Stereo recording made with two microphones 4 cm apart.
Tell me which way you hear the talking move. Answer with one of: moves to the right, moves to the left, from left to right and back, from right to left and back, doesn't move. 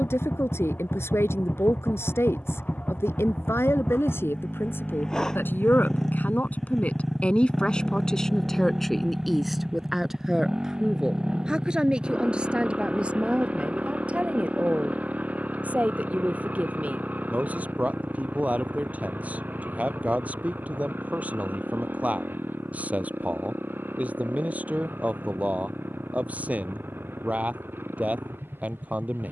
moves to the right.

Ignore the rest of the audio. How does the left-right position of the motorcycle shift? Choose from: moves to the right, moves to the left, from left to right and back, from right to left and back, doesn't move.
moves to the right.